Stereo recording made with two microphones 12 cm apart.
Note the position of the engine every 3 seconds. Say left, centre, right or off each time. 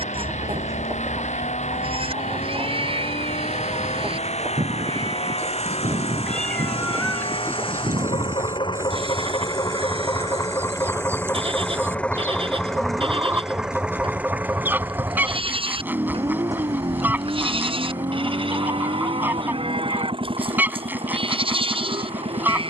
left, left, left, left, centre, right, right, right.